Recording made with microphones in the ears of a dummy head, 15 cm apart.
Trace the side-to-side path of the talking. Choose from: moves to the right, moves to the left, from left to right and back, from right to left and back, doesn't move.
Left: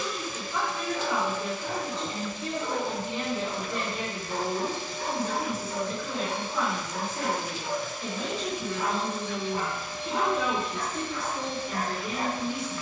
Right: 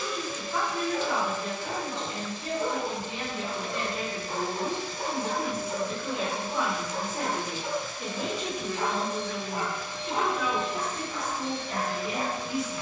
from left to right and back.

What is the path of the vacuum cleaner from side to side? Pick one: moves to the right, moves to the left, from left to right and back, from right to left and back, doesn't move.
moves to the right.